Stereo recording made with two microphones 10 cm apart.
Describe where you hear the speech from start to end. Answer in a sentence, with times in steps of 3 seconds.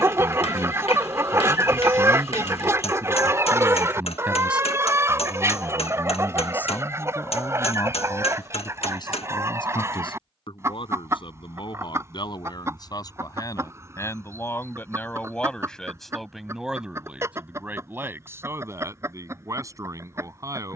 In this clip you hear the speech on the right from 0 s, in the centre from 3 s, on the left from 6 s, in the centre from 15 s and on the right from 18 s.